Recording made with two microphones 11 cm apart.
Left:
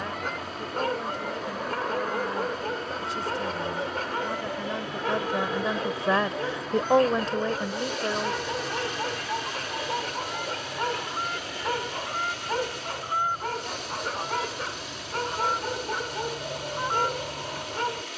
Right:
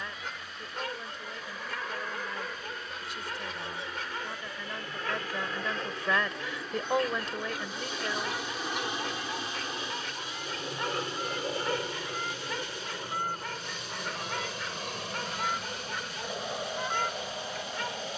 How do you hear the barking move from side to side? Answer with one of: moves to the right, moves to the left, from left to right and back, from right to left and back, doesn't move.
doesn't move.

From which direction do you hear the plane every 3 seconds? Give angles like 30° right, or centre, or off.
40° left, 20° left, centre, 30° right, 50° right, 60° right.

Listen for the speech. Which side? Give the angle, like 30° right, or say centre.
30° left.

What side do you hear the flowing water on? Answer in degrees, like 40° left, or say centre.
70° left.